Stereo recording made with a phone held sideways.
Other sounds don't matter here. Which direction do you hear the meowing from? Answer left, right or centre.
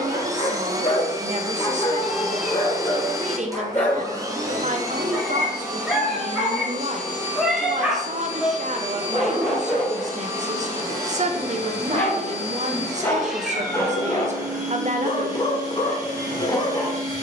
centre.